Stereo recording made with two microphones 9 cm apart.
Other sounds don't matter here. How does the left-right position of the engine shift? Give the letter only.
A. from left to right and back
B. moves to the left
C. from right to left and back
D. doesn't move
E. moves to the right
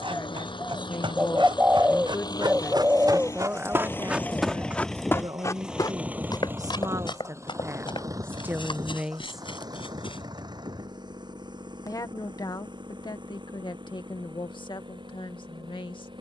E.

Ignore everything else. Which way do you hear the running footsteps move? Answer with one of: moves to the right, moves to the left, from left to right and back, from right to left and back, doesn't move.
moves to the left.